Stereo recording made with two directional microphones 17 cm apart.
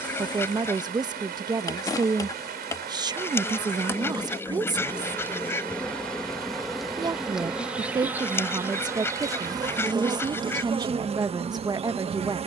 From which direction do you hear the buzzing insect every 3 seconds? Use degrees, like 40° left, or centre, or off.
20° left, 10° left, 10° right, 30° right.